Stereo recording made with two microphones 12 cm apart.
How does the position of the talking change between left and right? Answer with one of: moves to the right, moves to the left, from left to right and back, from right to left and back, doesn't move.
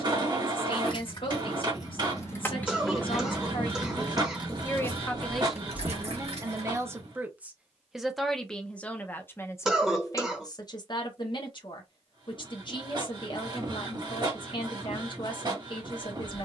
from left to right and back.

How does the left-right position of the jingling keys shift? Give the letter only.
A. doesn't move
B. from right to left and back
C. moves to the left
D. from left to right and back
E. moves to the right
E.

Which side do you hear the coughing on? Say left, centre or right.
centre.